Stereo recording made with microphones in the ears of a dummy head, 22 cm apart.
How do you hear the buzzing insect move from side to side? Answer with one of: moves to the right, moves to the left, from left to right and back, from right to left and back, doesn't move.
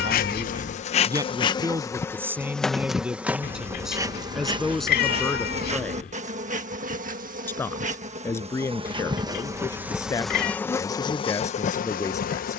from left to right and back.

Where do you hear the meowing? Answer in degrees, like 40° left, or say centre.
40° left.